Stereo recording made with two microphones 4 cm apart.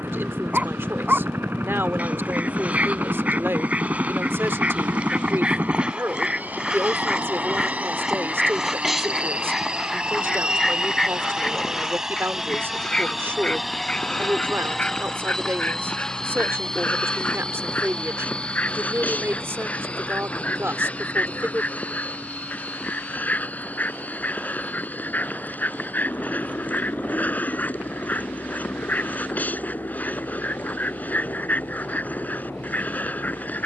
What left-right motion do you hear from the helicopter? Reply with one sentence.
In this clip you hear the helicopter move to the left.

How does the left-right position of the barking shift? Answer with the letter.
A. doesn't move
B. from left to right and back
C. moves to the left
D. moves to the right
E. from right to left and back
C.